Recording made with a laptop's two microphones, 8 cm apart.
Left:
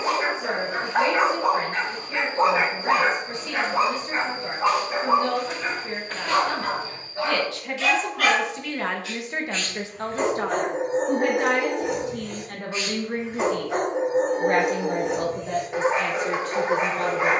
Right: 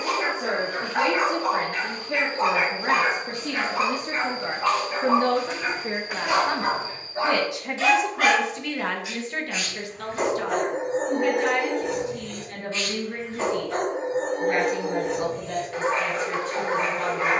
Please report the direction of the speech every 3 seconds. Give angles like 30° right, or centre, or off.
60° right, 50° right, 10° right, 40° left, 60° left, 70° left.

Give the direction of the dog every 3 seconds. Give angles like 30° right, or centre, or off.
30° left, 20° left, 20° right, centre, 20° left, 20° left.